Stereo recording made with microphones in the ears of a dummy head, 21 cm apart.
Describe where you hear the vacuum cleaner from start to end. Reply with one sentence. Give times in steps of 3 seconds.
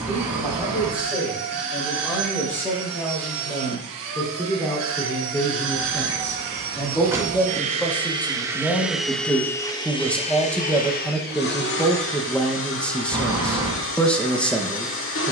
In this clip you hear the vacuum cleaner on the right from 0 s and on the left from 9 s.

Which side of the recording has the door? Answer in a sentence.
In this clip you hear the door in the centre.